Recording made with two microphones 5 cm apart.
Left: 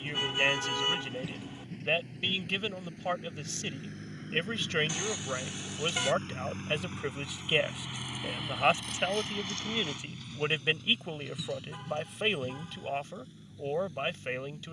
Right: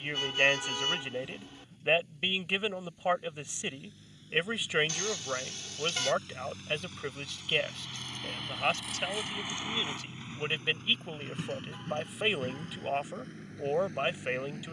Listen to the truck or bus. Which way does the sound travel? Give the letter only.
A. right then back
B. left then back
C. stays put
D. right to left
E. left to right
E.